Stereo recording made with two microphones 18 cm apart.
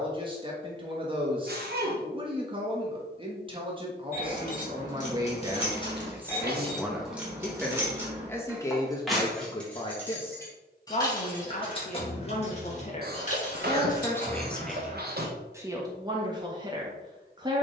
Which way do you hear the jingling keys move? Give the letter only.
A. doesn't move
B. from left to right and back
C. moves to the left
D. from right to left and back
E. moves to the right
B.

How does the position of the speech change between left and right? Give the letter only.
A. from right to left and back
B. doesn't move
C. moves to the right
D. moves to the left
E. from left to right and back
A.